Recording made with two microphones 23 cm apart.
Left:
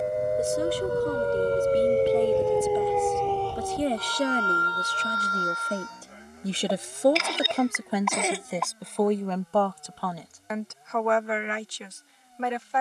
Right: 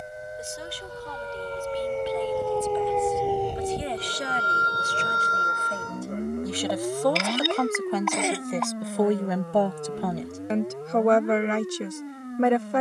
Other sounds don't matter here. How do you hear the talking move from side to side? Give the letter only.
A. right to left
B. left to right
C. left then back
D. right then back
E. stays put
B.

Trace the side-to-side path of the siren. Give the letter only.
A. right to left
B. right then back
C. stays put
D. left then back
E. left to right
E.